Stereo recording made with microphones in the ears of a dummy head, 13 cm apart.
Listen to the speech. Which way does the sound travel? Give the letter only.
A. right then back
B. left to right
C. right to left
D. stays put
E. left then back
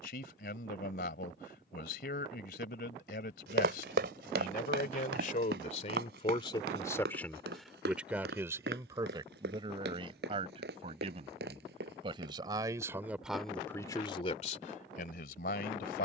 A.